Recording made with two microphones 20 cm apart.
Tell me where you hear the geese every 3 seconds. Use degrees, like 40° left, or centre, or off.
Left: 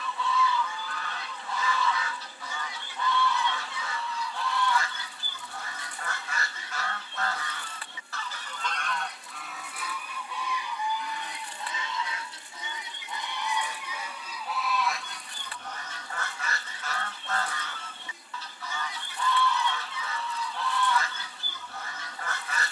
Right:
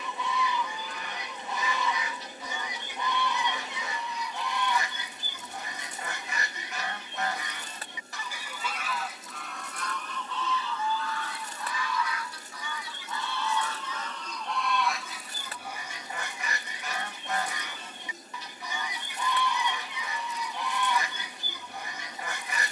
20° right, 20° right, 20° right, 10° left, 10° left, 10° right, 20° right, 20° right.